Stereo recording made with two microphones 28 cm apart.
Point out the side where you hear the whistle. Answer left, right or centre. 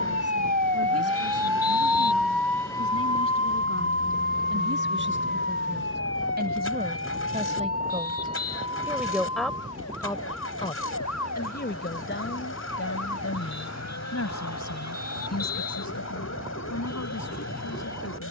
left.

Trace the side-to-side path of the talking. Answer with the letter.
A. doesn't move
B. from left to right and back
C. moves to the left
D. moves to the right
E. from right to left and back
C.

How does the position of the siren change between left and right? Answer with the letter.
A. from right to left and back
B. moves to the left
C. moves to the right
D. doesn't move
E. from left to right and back
B.